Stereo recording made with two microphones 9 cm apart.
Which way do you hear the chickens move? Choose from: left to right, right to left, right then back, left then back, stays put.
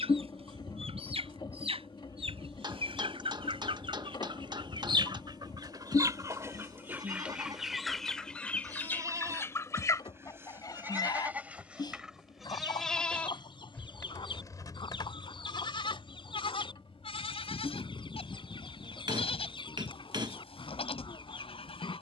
right to left.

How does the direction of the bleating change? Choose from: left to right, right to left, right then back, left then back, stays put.
right to left.